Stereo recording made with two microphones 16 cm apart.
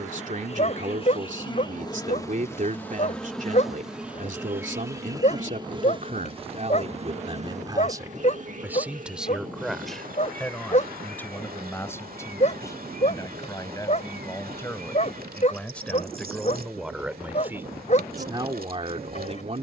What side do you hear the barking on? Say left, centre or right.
left.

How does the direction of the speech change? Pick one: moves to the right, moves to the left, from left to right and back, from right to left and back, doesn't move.
from right to left and back.